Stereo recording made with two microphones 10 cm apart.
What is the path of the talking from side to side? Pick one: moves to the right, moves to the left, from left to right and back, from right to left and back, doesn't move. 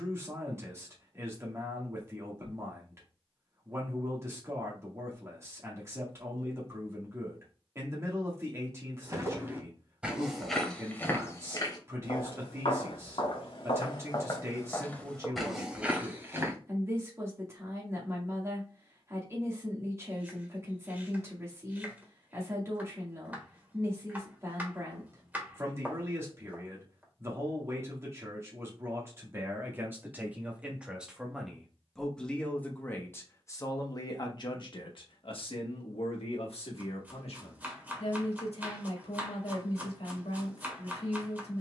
moves to the left.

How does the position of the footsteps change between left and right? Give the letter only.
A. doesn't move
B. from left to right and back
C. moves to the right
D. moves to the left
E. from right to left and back
E.